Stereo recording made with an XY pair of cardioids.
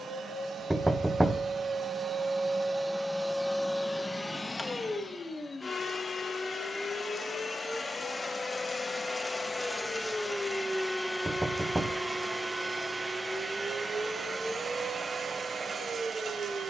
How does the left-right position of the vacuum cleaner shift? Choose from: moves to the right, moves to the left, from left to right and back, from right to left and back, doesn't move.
from right to left and back.